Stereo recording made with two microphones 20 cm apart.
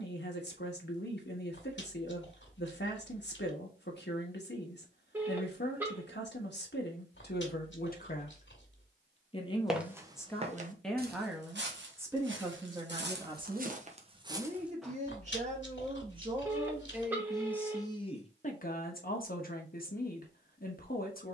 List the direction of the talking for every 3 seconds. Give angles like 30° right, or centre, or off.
60° left, 60° left, 50° left, 10° left, 20° right, 20° right, 50° left.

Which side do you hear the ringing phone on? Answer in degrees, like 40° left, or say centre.
10° right.